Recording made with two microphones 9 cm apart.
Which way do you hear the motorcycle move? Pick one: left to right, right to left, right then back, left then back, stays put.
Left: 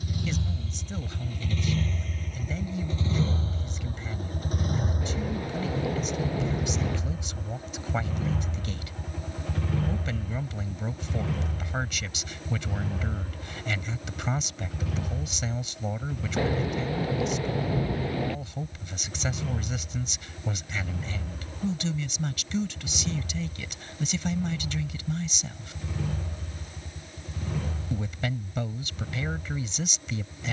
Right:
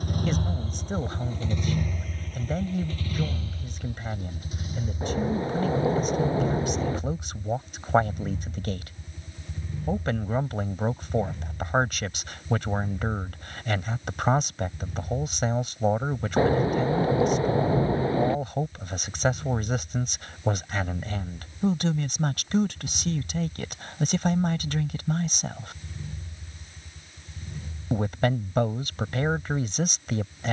right to left.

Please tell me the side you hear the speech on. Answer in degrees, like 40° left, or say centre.
50° right.